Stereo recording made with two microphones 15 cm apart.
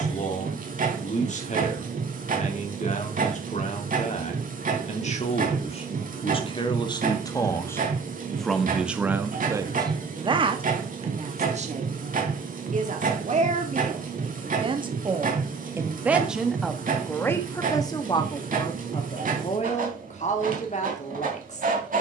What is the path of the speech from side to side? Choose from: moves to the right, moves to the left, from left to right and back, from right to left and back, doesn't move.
from left to right and back.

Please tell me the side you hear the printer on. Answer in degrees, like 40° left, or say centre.
60° right.